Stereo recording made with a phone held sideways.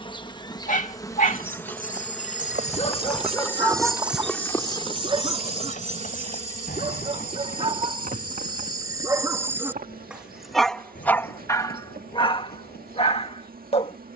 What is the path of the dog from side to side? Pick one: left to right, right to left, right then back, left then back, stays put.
right then back.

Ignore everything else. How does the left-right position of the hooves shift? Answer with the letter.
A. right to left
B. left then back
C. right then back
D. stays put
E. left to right
A.